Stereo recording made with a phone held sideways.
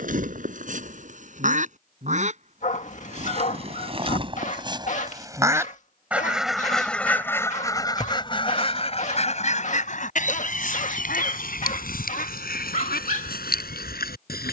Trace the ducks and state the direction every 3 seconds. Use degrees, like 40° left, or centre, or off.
50° right, 30° right, 20° left, 60° left, 70° left.